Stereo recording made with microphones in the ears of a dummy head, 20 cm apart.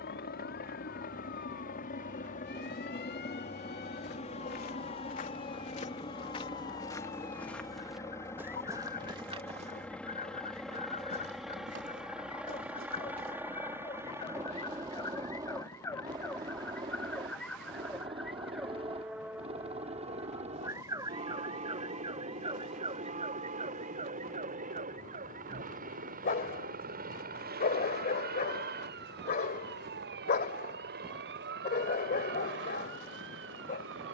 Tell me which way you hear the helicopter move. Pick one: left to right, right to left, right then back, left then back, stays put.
left to right.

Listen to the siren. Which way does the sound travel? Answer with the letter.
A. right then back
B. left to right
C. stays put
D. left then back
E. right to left
B.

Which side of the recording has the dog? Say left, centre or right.
left.